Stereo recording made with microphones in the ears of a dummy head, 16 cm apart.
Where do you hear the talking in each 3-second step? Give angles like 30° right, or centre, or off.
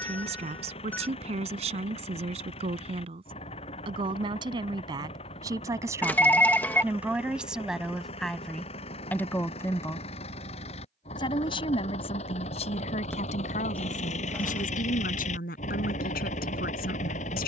40° right, 20° right, centre, 20° left, 40° left, 50° left.